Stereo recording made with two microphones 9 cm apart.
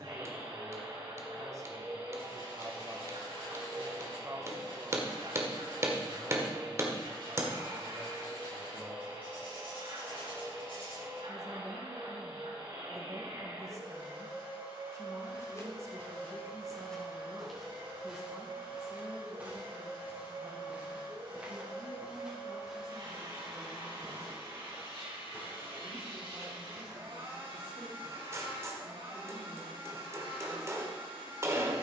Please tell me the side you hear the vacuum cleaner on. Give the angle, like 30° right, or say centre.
60° right.